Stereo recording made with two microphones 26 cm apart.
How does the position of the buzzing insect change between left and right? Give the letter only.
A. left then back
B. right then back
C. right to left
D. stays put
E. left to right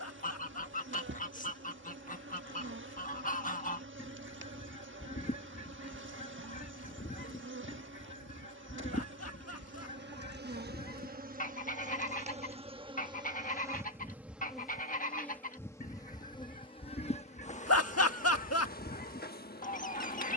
C.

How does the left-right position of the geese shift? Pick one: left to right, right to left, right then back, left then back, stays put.
stays put.